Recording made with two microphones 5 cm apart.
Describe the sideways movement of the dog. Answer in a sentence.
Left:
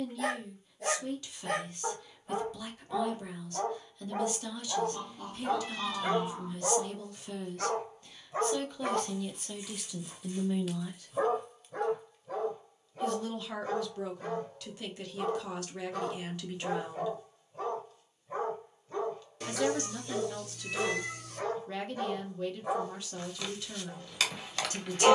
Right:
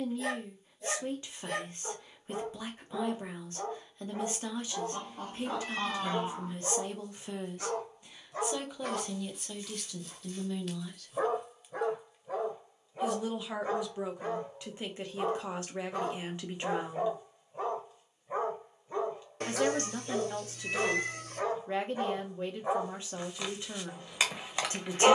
You can hear the dog move from left to right.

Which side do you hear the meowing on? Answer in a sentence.
In this clip you hear the meowing on the right.